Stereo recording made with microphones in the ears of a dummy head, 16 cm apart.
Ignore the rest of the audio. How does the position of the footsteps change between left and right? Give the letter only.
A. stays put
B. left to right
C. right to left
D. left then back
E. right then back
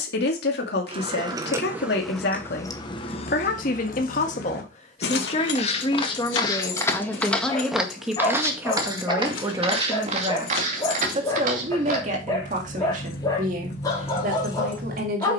B.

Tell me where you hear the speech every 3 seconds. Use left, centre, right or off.
left, left, centre, right, right.